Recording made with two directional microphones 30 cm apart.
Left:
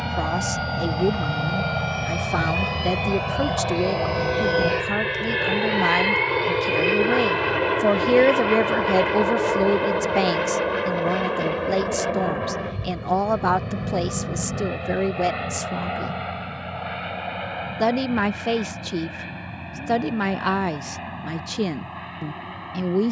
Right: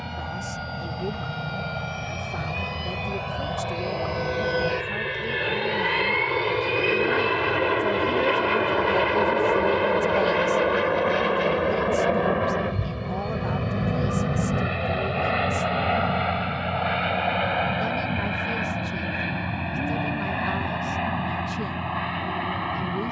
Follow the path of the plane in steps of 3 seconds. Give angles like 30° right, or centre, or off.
40° left, 20° left, centre, 20° right, 30° right, 40° right, 50° right, 60° right.